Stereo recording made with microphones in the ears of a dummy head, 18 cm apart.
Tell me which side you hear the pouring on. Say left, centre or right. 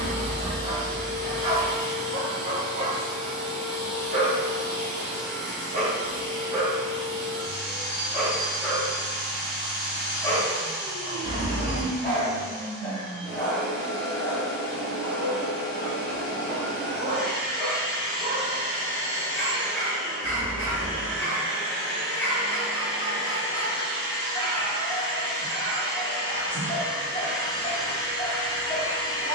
right.